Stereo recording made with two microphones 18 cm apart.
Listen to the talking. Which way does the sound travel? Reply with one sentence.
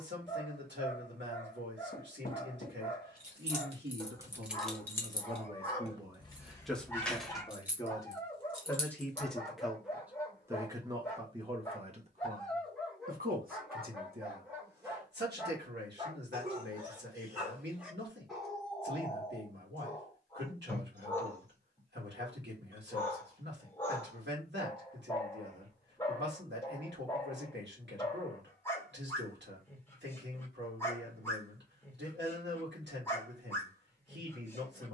You can hear the talking go left and come back.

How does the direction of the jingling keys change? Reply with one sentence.
In this clip you hear the jingling keys go left and come back.